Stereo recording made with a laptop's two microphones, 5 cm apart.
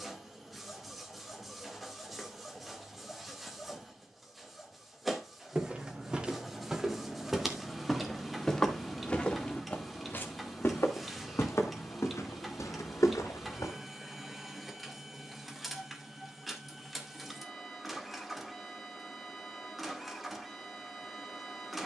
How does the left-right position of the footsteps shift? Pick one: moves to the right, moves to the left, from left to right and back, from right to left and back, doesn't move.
moves to the left.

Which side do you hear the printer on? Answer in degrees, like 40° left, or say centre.
centre.